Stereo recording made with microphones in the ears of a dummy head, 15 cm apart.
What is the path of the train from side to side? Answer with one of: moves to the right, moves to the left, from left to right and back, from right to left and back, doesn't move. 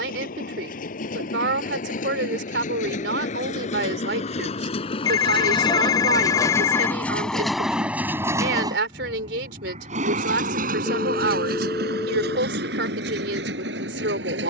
moves to the right.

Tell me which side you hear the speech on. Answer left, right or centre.
right.